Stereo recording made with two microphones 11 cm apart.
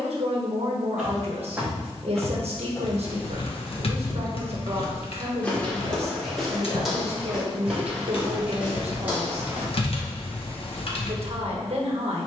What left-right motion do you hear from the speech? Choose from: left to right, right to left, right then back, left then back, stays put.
stays put.